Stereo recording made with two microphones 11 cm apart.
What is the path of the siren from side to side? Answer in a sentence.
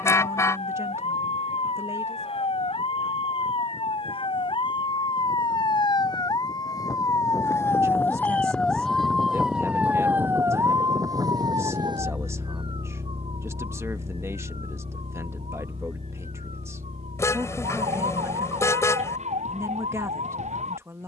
In this clip you hear the siren move to the right.